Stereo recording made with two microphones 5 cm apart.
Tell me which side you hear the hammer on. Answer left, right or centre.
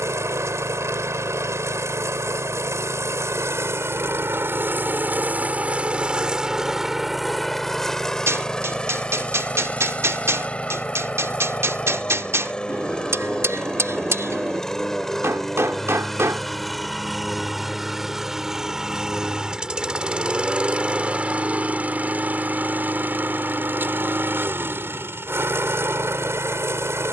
right.